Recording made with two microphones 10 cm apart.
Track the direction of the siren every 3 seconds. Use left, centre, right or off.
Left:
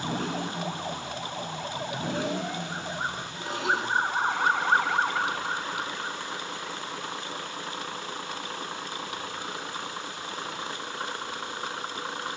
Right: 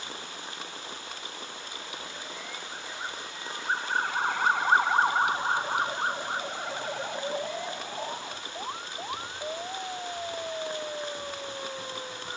left, centre, right, right.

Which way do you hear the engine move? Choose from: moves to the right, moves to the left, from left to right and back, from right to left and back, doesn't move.
doesn't move.